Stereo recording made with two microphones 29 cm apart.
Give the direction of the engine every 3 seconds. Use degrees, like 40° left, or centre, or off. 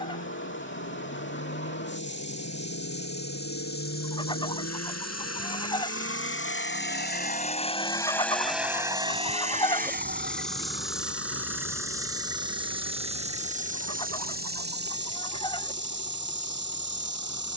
80° left, 70° left, 20° left, 40° right, 60° right, 70° right.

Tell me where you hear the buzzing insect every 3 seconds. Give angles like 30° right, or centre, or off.
40° left, 30° left, 20° left, centre, 30° right, 40° right.